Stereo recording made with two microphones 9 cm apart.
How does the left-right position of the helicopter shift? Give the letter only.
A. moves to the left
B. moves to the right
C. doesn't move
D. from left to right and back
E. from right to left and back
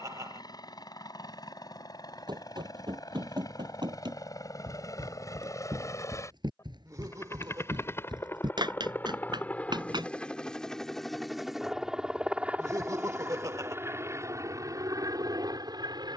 B.